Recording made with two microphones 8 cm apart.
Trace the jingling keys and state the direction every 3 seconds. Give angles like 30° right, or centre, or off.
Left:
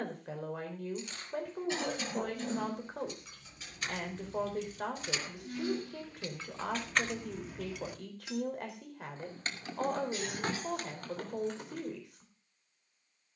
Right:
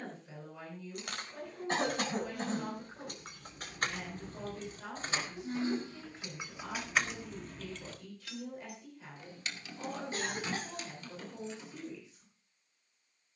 60° right, 40° right, centre, 50° left, off.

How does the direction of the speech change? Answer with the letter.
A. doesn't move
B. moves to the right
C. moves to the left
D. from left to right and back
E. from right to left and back
A.